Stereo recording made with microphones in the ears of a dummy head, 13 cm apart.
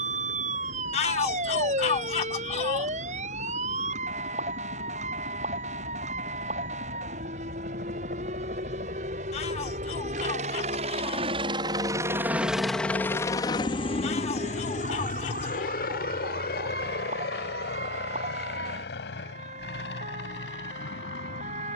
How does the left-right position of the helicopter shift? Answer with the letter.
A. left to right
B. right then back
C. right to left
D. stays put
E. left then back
C.